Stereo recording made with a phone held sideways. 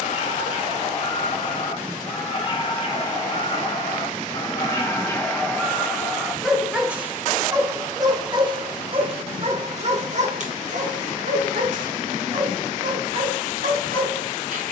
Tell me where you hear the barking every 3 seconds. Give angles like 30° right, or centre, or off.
40° left, 20° left, 20° right, 60° right, 70° right.